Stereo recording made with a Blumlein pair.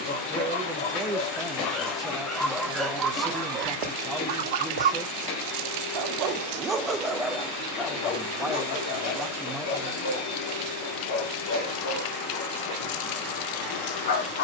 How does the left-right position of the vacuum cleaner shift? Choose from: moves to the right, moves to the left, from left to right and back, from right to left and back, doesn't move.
doesn't move.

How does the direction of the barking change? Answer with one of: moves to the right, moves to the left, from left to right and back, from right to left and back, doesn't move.
from left to right and back.